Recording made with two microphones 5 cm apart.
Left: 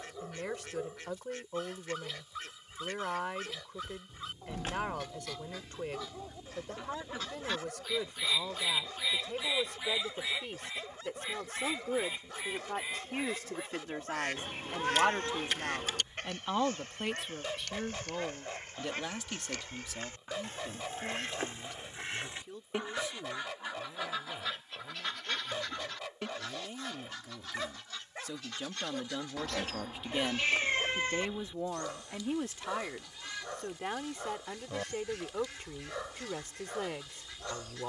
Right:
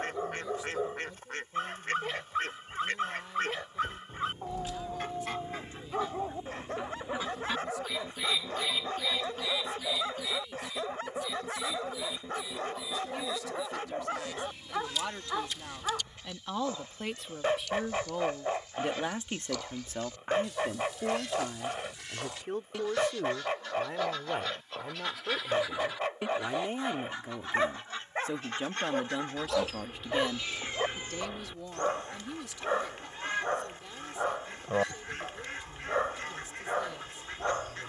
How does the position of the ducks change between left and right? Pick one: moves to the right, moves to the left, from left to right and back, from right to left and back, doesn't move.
from right to left and back.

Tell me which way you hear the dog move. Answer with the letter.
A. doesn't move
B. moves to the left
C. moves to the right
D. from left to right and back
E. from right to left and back
A.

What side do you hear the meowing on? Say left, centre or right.
left.